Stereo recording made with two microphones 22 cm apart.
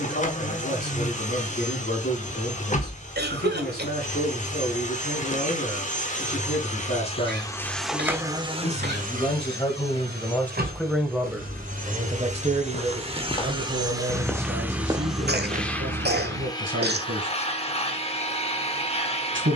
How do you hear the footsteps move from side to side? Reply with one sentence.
You can hear the footsteps move from left to right.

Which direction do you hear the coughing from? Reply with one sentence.
You can hear the coughing on the right.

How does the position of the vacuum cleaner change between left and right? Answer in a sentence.
In this clip you hear the vacuum cleaner move from left to right and back again.